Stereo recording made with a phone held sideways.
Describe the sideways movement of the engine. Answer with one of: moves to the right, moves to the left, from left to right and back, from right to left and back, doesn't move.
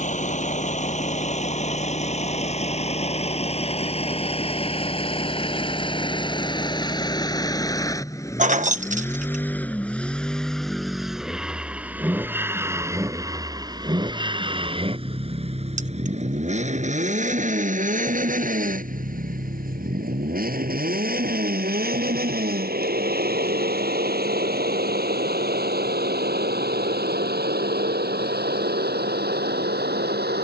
moves to the right.